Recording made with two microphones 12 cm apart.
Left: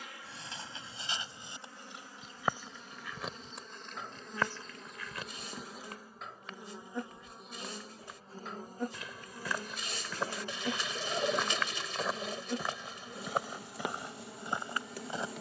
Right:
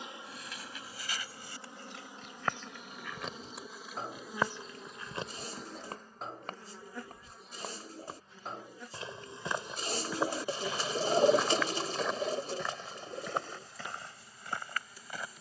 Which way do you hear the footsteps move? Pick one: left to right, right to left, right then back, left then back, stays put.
right then back.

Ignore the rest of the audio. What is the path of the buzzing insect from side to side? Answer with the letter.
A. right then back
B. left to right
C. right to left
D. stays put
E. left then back
C.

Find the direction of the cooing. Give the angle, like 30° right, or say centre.
40° right.